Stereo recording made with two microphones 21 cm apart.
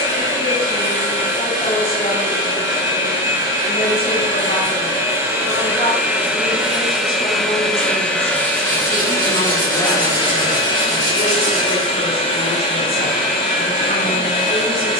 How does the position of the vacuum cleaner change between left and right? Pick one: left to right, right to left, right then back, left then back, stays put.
right to left.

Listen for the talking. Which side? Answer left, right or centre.
left.